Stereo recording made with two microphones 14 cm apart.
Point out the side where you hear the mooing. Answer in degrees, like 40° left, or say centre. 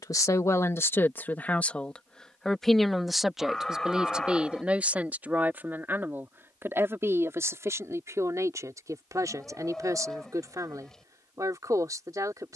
centre.